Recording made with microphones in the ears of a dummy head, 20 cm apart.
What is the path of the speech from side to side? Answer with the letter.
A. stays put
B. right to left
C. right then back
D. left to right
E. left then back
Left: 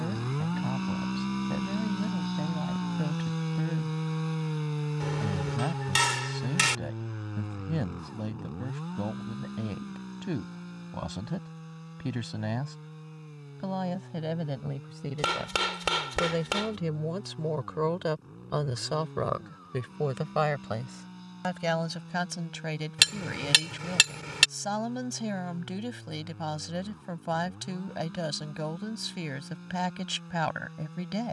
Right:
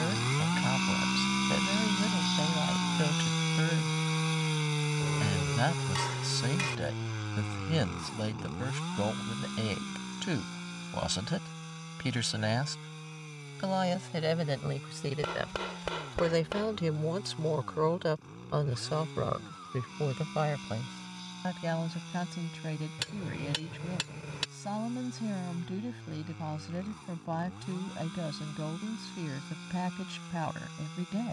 B.